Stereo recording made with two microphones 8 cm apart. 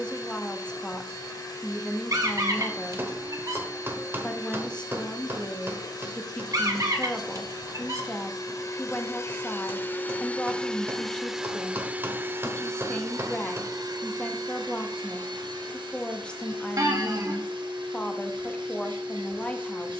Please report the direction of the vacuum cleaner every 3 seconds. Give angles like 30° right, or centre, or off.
50° left, 50° left, 50° left, 10° left, 40° right, 70° right, 70° right.